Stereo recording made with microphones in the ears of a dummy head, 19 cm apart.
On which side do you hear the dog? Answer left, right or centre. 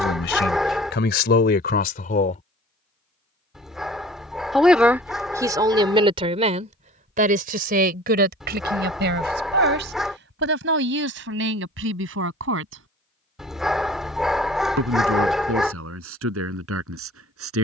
centre.